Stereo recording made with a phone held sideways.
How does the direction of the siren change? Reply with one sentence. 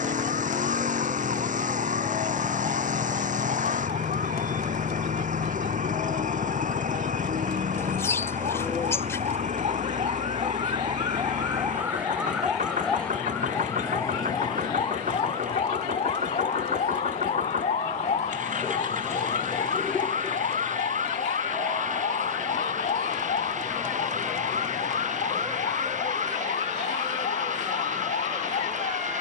In this clip you hear the siren go from the right side to the left.